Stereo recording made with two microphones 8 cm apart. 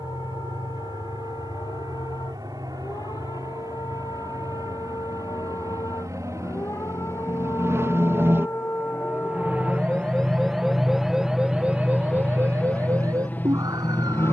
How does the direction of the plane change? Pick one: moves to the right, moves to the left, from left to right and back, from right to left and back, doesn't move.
moves to the left.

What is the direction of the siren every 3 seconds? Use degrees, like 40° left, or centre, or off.
60° left, 50° left, 40° left, centre, 40° right.